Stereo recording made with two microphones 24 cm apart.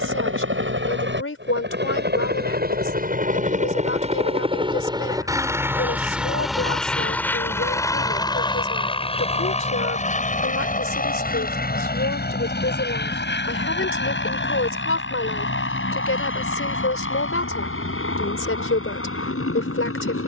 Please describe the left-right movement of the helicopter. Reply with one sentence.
In this clip you hear the helicopter move to the left.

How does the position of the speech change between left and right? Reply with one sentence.
In this clip you hear the speech stay put.